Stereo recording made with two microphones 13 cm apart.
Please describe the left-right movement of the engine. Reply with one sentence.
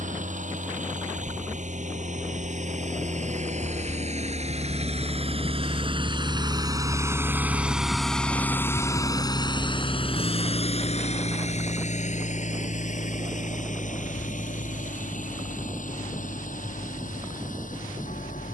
You can hear the engine go from the right side to the left.